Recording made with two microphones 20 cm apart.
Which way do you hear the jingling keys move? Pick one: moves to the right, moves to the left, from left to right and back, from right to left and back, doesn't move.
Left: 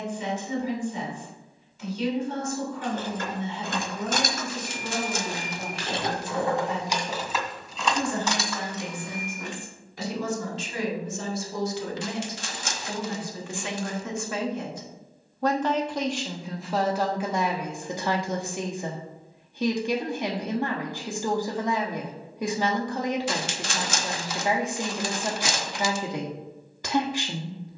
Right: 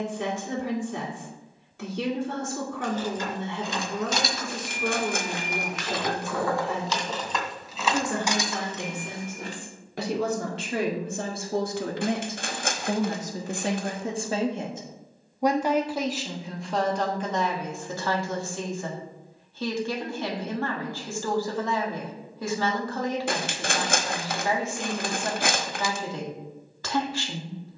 moves to the right.